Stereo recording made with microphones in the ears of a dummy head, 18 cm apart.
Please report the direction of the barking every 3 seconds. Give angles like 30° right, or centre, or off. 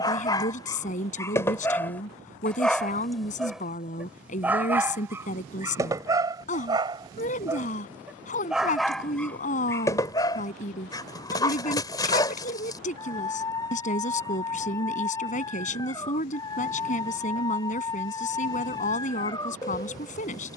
10° left, 10° right, 10° right, 20° left, 20° left, 20° left, 20° left.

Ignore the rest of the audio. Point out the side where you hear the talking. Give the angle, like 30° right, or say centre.
40° left.